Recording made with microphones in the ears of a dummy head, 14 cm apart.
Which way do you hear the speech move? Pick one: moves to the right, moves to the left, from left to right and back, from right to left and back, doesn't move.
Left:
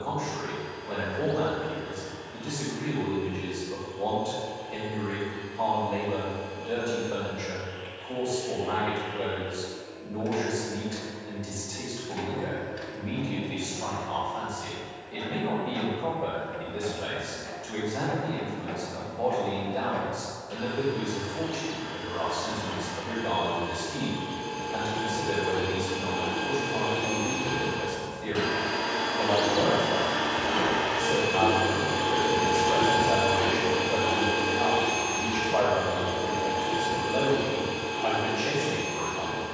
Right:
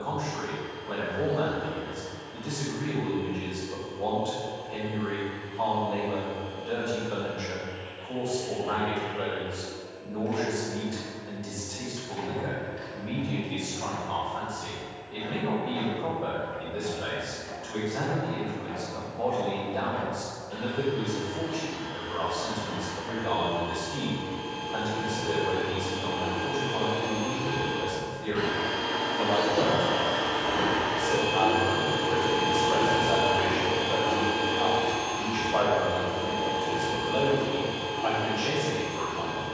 doesn't move.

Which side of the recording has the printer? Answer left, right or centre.
left.